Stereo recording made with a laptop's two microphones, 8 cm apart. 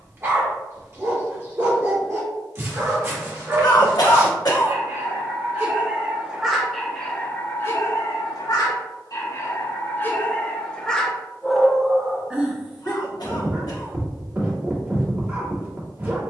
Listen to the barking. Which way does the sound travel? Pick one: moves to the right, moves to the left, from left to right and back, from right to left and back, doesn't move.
from right to left and back.